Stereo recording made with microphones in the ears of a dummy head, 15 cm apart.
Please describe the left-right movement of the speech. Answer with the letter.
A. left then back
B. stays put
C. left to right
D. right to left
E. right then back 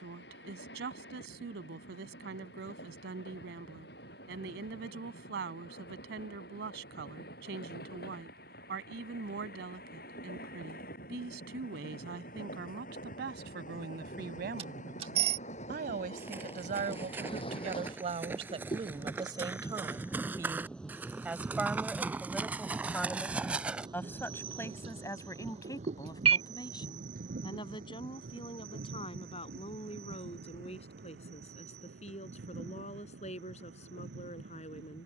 D.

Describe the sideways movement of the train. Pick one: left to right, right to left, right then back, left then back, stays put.
left to right.